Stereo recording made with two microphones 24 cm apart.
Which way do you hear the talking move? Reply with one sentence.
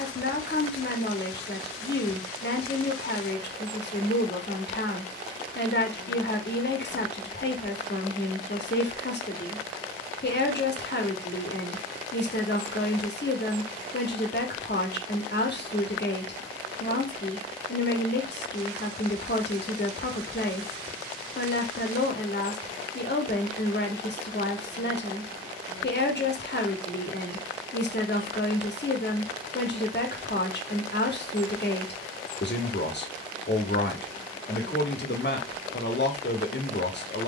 In this clip you hear the talking stay put.